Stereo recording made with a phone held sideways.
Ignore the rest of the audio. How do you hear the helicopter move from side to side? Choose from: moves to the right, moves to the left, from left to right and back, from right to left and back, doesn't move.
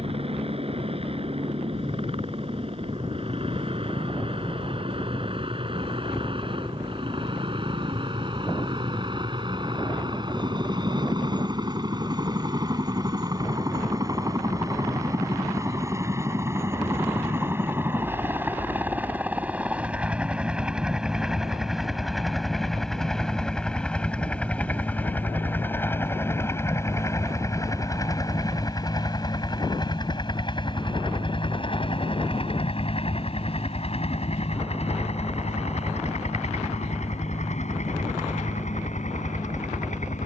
moves to the left.